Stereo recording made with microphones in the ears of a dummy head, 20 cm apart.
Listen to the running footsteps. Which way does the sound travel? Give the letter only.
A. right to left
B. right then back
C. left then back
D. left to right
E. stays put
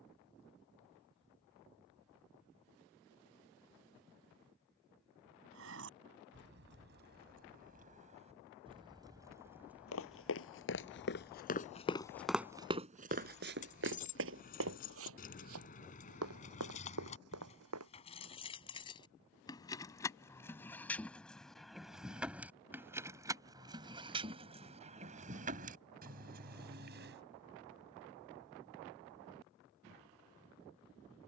D.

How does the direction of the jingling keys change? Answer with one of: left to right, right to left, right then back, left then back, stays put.
left then back.